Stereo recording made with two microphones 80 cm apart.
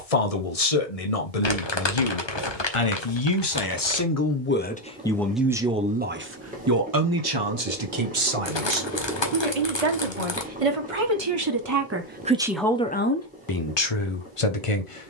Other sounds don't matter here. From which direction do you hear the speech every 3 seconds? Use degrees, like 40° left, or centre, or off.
50° left, 10° left, 30° right, 40° right, 20° left.